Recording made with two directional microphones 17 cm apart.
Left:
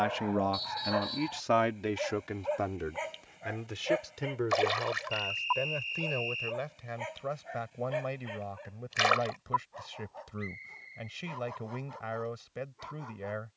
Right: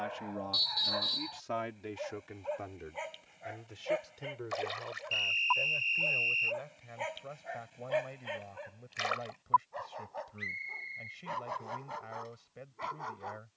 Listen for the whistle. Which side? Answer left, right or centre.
right.